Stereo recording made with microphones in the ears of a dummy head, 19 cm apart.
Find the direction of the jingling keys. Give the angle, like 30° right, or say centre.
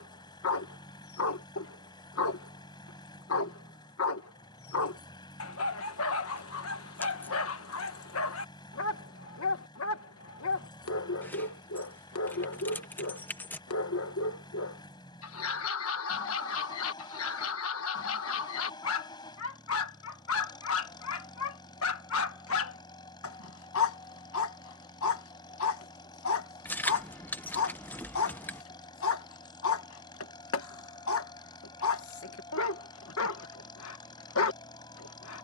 10° left.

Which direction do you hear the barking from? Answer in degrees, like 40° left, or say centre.
70° left.